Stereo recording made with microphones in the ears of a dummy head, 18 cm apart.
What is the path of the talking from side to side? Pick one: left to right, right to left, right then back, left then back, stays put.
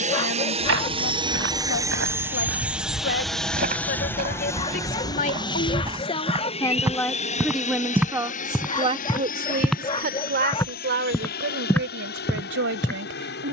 left to right.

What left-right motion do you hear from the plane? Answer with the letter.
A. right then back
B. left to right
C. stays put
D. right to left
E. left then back
D.